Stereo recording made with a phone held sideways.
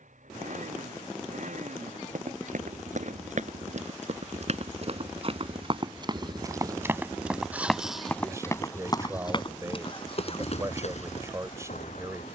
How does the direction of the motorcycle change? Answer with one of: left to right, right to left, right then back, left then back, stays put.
right to left.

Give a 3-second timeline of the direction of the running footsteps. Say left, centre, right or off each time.
right, right, centre, left.